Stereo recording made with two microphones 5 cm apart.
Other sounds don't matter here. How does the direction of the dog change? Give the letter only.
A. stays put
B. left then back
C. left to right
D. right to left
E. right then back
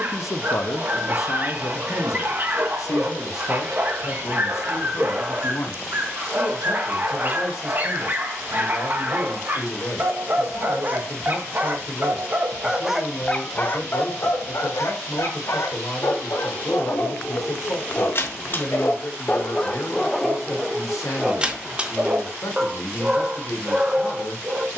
B.